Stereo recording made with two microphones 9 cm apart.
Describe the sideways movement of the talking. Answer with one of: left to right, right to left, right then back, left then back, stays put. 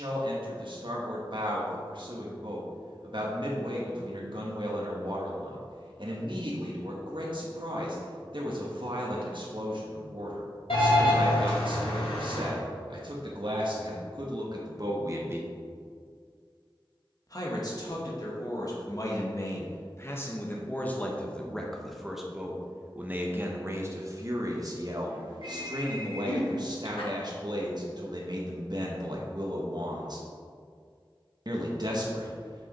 left then back.